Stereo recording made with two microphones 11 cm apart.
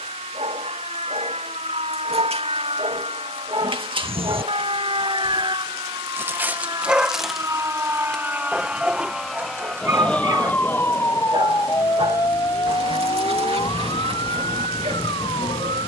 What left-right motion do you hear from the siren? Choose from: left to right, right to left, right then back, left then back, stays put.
right to left.